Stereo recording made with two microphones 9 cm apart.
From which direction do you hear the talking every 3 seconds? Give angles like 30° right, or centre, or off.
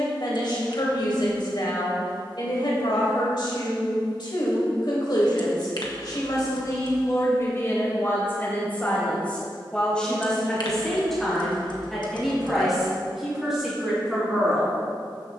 60° left, 60° left, 40° left, 10° left, 10° right.